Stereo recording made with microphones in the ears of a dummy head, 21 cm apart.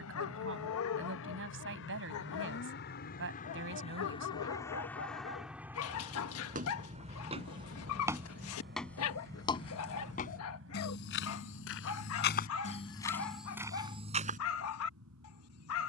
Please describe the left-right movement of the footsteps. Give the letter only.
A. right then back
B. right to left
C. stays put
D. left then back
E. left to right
D.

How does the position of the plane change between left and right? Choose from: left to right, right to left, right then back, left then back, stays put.
left to right.